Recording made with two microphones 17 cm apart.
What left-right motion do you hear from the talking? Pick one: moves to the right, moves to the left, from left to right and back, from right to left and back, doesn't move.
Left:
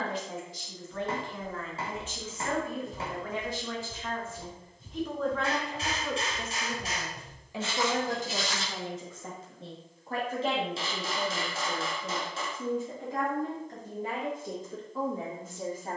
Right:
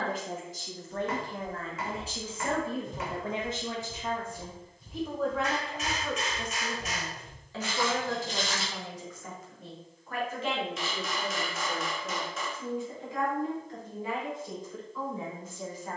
moves to the left.